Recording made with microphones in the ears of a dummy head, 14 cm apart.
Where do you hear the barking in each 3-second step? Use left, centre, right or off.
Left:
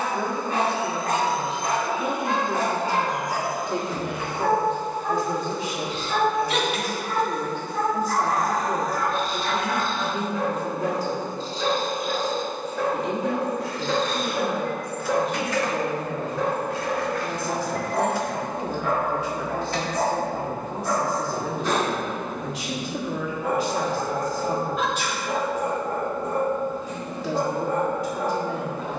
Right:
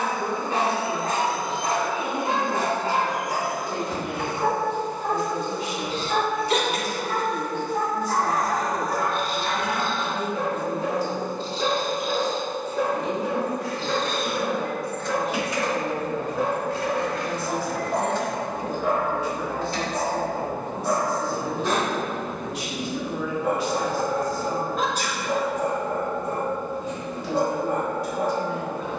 right, right, right, right, centre, centre, right, right, right, right.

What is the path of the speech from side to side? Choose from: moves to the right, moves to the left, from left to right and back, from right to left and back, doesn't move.
doesn't move.